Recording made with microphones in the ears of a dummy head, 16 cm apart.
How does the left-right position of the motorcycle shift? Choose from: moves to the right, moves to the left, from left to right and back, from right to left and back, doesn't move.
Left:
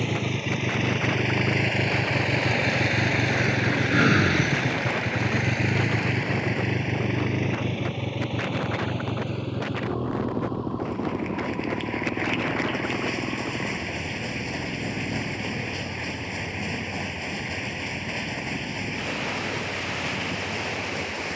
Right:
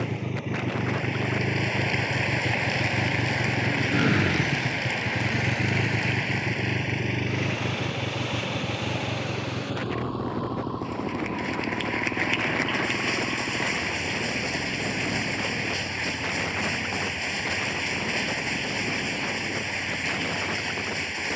moves to the right.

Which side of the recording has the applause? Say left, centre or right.
right.